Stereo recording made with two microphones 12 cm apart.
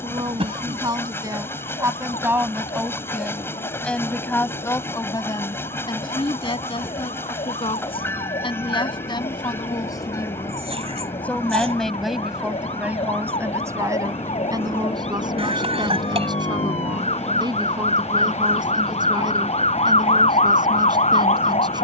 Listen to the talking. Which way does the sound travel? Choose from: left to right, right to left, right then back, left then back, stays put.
left then back.